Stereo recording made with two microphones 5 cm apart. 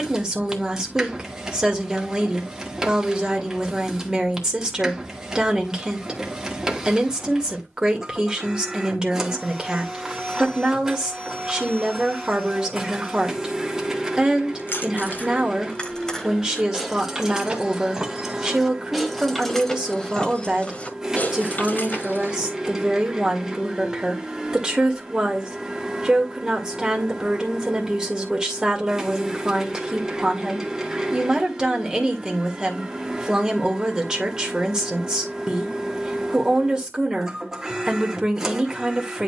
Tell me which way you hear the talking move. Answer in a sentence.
You can hear the talking stay put.